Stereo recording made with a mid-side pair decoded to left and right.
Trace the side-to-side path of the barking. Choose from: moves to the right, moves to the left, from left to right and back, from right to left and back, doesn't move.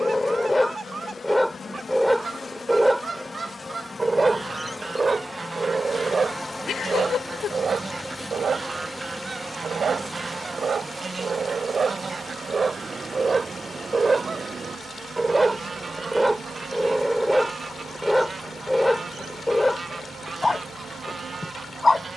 from left to right and back.